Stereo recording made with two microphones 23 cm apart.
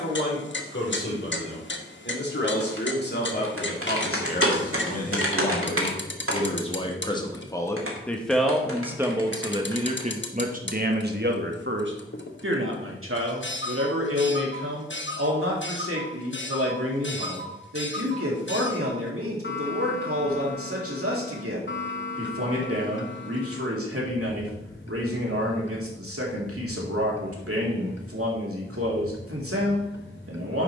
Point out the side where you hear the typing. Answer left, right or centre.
right.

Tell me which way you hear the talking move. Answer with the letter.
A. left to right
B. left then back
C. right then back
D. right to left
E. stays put
A.